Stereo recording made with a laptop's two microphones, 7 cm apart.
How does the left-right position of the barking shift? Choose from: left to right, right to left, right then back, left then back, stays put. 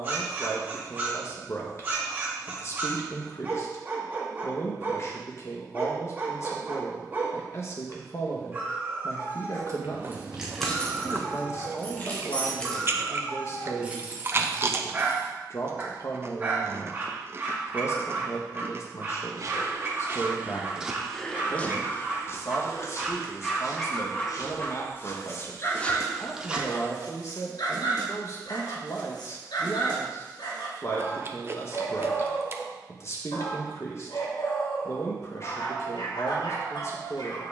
right to left.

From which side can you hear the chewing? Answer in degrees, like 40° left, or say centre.
30° right.